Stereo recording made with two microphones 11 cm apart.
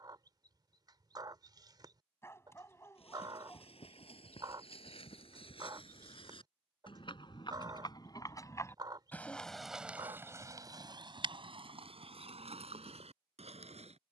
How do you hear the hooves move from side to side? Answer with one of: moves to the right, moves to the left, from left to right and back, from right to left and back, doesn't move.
moves to the right.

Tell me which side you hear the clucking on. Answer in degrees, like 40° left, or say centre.
40° right.